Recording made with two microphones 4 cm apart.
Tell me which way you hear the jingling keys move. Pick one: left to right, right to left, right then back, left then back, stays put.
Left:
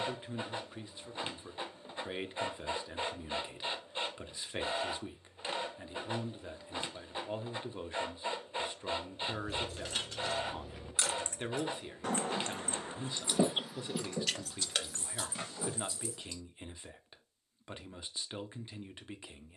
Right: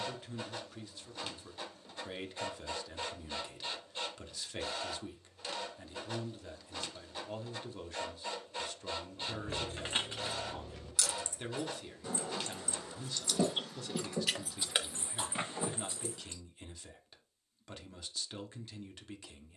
left then back.